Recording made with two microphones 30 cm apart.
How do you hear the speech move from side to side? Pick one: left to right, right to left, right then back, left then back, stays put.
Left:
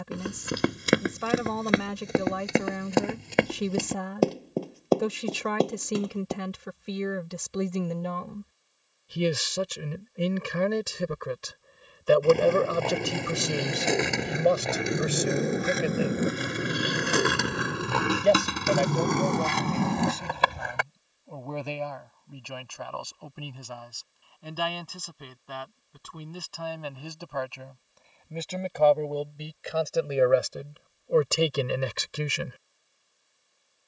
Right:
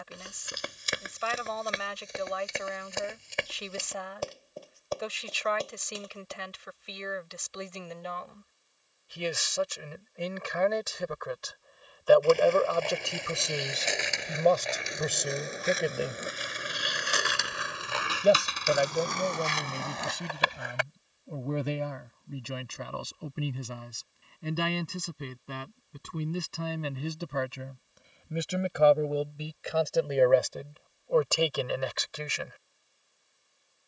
right then back.